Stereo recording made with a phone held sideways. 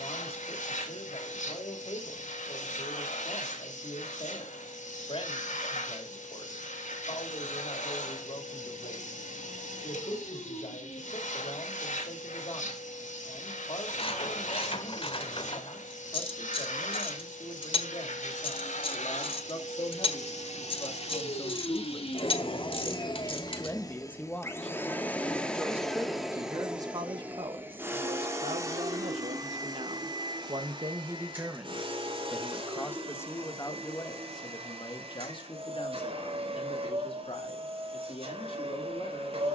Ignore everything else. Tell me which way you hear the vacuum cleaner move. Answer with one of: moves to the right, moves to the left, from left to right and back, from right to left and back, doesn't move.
moves to the right.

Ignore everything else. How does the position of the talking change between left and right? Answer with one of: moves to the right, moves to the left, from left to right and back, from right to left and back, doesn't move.
from left to right and back.